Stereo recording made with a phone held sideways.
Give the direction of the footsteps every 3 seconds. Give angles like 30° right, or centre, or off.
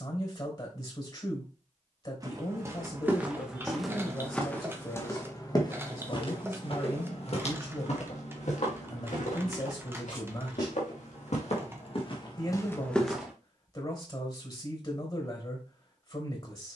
20° right, 10° left, 50° left, 60° left, 20° left, off.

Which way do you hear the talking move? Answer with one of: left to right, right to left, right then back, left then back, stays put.
stays put.